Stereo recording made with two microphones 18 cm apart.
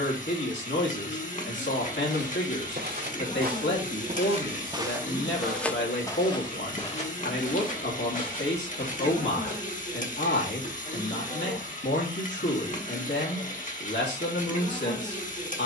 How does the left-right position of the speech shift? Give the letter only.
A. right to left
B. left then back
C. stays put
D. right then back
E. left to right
C.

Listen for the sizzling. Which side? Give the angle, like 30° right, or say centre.
50° left.